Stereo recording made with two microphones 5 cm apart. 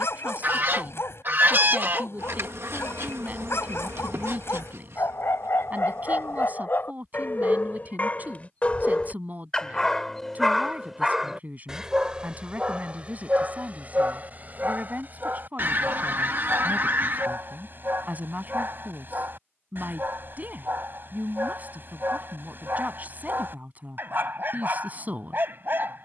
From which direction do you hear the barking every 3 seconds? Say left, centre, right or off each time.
left, left, left, centre, right, right, right, right, right.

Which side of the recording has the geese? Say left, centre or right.
right.